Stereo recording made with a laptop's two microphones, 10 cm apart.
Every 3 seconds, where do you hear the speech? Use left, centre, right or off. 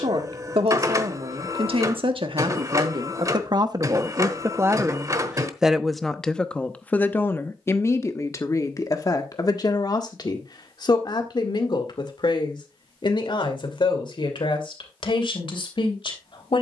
right, right, left, left, left, left.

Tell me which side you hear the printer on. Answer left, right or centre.
right.